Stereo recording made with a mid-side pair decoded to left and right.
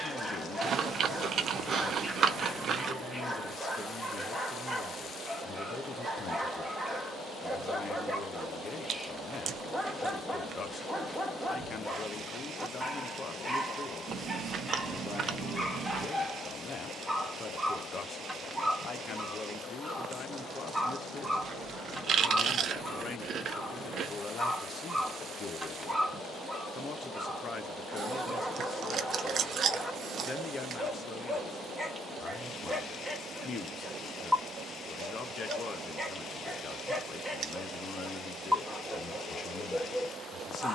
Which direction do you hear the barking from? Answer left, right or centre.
centre.